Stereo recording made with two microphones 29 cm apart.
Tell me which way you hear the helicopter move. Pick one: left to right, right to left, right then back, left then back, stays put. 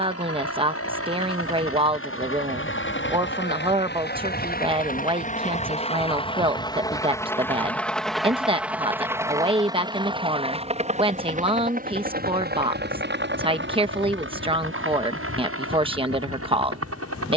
left to right.